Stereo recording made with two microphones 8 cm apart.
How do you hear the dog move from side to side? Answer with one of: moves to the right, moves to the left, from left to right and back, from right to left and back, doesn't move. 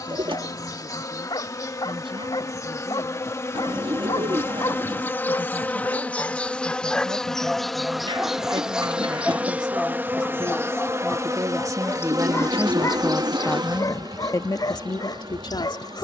from left to right and back.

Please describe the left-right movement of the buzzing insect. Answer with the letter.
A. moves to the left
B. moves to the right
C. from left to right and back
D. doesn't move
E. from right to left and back
B.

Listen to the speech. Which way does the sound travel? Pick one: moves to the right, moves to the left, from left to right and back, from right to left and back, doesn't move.
moves to the left.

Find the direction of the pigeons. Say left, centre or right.
right.